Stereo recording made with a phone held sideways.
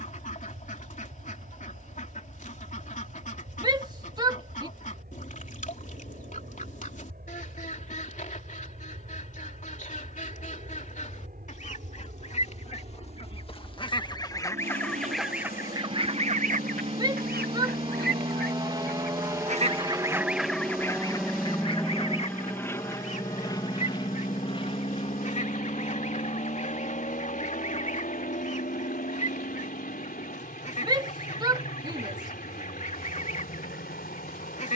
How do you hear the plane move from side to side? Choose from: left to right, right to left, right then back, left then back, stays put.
right to left.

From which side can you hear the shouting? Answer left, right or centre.
right.